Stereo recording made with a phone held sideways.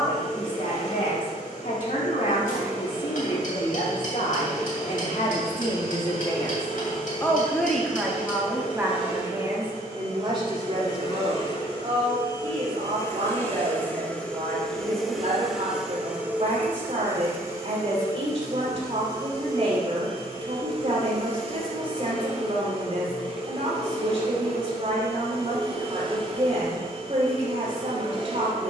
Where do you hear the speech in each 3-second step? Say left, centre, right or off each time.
left, left, centre, right, right, right, right, right, right, right.